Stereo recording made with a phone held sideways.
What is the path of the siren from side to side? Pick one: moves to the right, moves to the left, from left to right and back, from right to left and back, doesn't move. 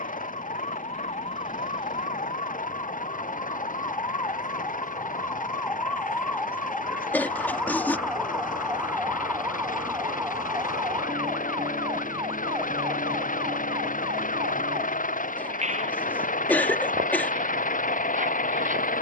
moves to the right.